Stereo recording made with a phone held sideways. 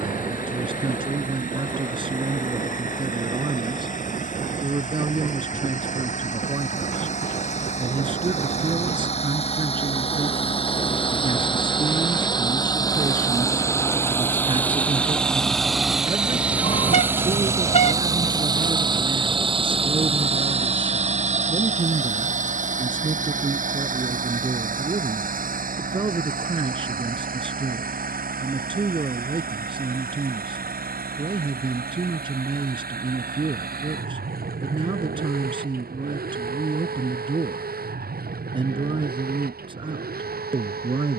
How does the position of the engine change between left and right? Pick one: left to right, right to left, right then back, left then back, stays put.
left to right.